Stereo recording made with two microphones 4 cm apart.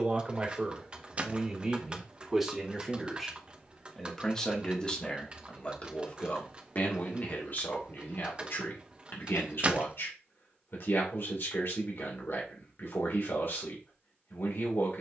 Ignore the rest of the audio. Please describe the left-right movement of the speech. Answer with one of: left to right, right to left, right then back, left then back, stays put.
right to left.